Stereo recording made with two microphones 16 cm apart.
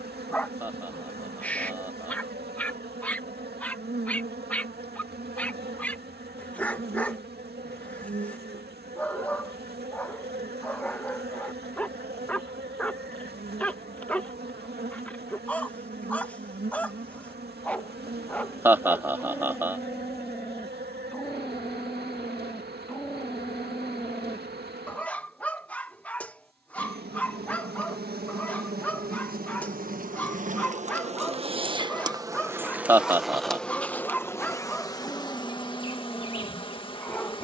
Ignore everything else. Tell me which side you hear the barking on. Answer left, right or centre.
centre.